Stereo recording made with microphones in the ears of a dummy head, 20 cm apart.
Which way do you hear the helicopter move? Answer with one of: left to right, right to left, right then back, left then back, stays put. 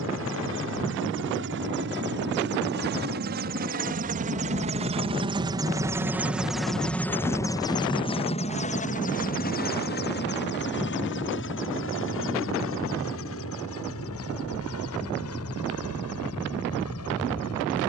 right to left.